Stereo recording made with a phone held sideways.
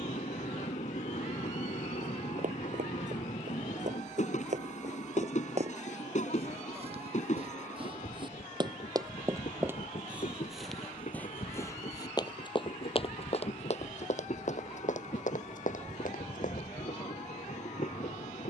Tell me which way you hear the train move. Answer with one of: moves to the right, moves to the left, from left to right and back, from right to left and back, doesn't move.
doesn't move.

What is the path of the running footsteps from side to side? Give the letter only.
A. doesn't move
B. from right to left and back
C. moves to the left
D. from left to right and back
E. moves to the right
C.